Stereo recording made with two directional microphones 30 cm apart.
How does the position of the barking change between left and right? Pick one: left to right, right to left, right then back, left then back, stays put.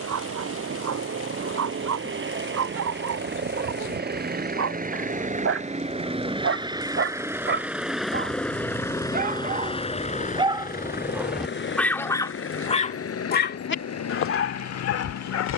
right to left.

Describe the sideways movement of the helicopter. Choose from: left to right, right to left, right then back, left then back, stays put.
right to left.